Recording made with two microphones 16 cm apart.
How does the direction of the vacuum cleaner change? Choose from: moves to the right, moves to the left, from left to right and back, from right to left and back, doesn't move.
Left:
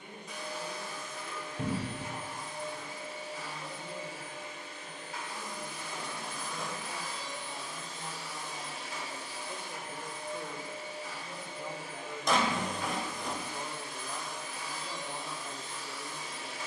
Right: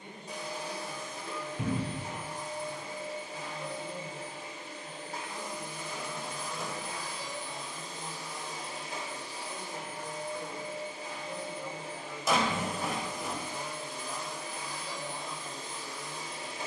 doesn't move.